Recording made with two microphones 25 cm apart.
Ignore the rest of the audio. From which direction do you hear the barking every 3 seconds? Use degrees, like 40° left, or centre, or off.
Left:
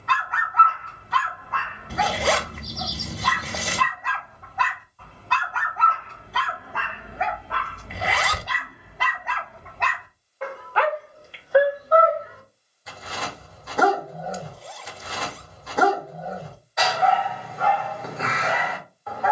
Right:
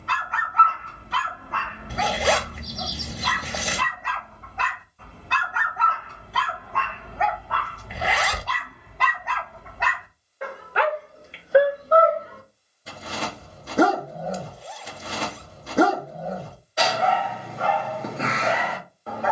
30° right, 20° right, 10° left, 10° right, 30° right, 30° right, 30° right.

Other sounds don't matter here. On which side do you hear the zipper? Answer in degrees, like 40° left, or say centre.
centre.